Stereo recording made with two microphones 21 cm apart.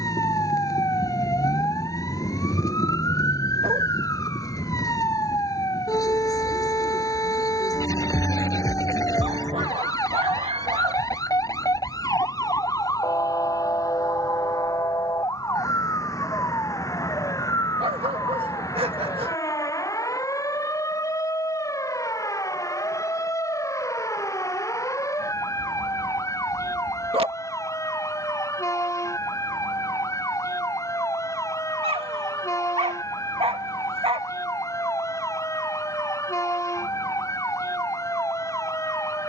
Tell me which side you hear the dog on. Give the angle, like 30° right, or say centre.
30° right.